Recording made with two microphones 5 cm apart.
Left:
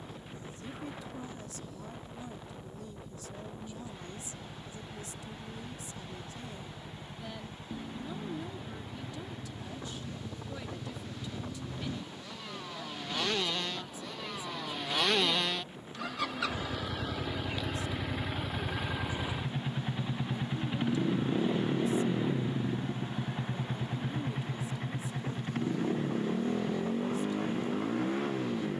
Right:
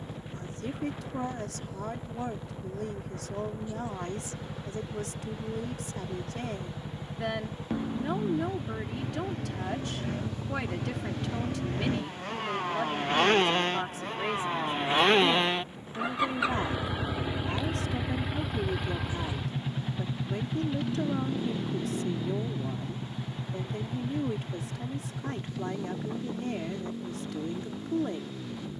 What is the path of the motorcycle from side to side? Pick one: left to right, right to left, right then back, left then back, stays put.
right to left.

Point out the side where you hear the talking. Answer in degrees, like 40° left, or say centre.
80° right.